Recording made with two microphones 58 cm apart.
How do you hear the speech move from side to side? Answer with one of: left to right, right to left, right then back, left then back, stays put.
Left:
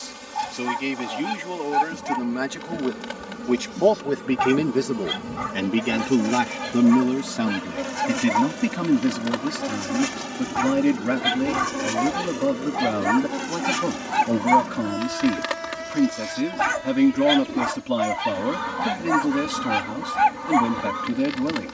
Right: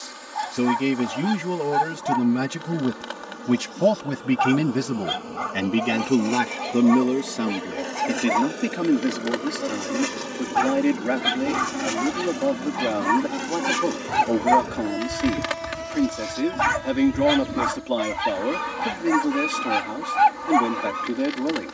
right to left.